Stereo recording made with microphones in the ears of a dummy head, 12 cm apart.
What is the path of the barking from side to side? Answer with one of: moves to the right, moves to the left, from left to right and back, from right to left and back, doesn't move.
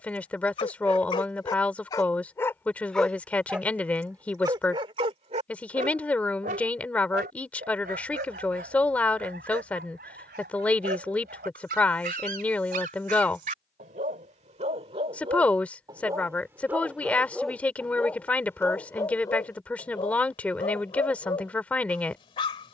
from left to right and back.